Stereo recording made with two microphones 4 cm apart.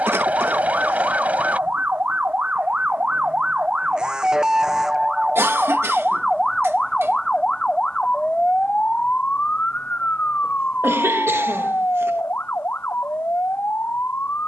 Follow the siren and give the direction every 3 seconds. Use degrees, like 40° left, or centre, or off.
40° right, 10° right, 20° left, 40° left, 50° left.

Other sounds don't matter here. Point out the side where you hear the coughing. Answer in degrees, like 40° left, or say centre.
80° right.